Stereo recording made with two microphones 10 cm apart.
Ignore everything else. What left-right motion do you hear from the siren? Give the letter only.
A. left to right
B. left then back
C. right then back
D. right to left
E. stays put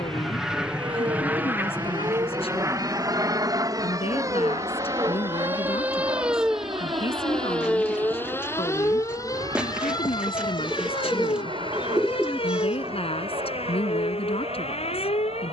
D.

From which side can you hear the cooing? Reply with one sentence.
In this clip you hear the cooing in the centre.